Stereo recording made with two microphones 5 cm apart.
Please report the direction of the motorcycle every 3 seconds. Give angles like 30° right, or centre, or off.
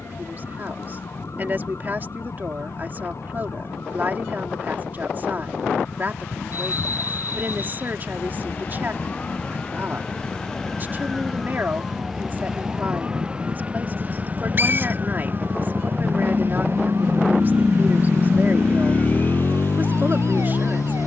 70° right, 70° right, 60° right, 60° right, 50° right, 30° right, 40° left.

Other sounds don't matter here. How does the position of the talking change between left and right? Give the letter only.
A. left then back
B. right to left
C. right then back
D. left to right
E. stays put
E.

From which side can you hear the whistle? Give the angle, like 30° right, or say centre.
40° right.